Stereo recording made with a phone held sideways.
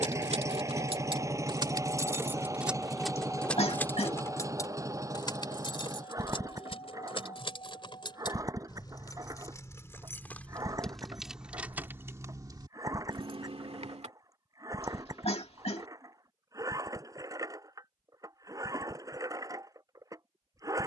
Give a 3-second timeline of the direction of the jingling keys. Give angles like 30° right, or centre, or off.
30° right, 20° left, 40° left, 10° left, 40° right, off, off.